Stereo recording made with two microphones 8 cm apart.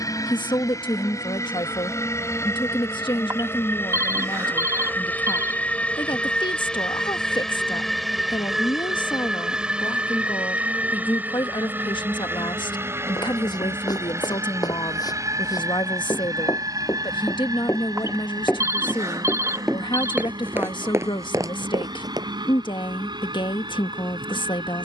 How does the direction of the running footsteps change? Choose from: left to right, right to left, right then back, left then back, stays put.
left to right.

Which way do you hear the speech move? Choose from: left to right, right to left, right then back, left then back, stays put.
stays put.